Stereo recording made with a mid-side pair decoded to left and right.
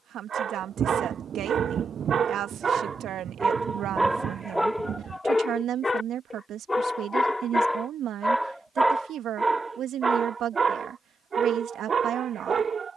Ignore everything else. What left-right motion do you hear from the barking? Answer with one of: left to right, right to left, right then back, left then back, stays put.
left then back.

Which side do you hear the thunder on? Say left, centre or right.
right.